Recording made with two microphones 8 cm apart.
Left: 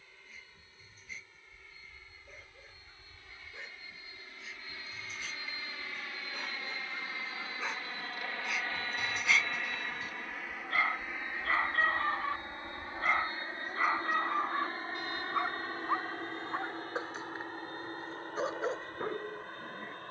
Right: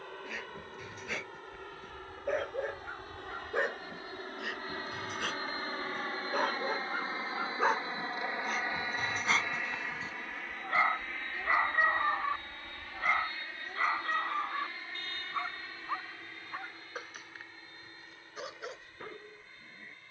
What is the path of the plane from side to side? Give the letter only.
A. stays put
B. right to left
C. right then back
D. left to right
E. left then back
B.